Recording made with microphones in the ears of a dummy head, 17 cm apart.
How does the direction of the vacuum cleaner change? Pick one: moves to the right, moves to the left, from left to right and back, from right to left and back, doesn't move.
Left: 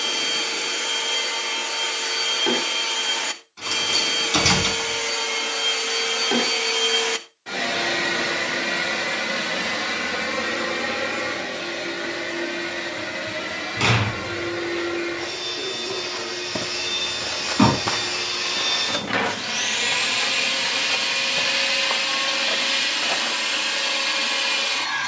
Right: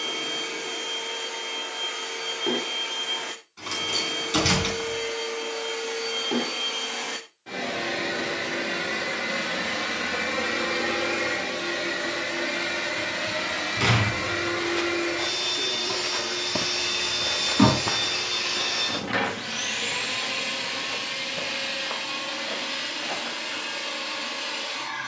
from left to right and back.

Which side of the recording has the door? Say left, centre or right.
centre.